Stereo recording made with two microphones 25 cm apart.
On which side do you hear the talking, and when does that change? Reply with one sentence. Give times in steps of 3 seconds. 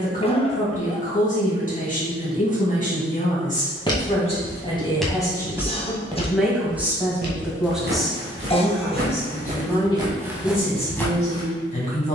You can hear the talking on the left from 0 s, in the centre from 6 s and on the left from 9 s.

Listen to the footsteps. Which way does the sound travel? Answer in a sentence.
In this clip you hear the footsteps move from left to right and back again.